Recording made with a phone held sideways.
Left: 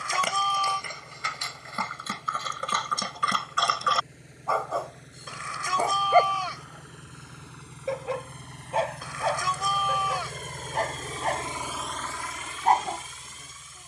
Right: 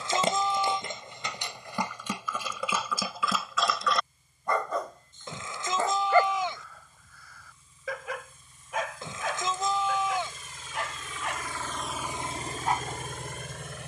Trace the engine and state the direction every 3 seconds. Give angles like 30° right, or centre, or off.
80° left, 80° left, 80° left, 50° left, 50° right.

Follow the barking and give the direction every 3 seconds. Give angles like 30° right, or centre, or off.
20° right, centre, 30° left, 40° left, 50° left.